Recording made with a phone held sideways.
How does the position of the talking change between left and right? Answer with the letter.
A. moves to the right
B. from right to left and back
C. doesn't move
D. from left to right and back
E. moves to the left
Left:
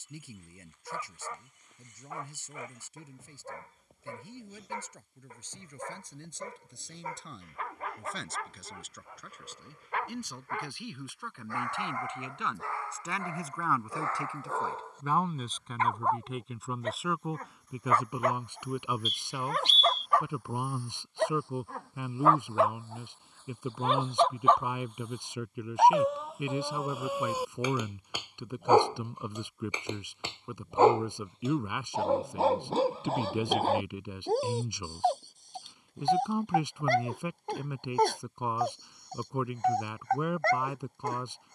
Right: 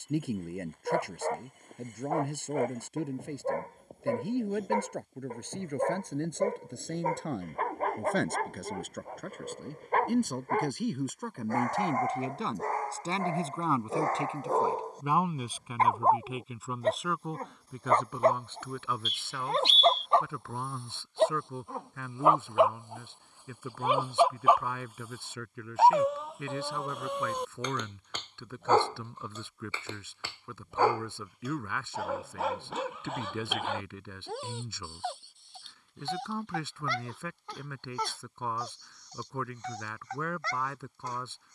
E.